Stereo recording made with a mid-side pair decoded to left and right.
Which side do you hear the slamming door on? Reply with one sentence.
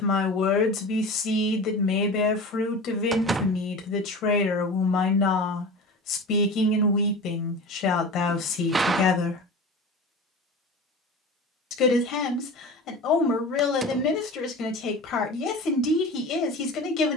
In this clip you hear the slamming door on the right.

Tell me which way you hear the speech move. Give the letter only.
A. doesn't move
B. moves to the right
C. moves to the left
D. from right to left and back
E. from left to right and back
A.